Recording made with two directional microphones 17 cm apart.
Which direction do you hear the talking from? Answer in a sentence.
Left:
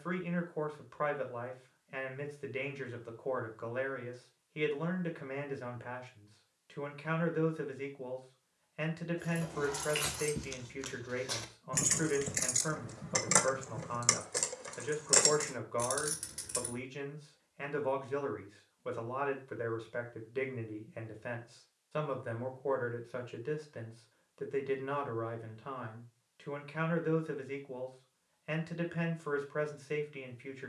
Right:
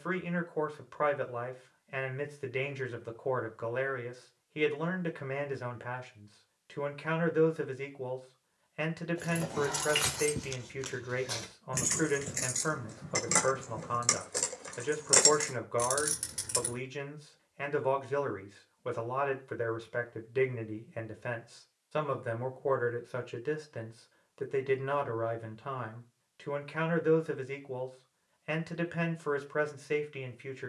In this clip you hear the talking on the right.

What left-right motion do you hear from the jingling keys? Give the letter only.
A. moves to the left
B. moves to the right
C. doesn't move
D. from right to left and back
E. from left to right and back
D.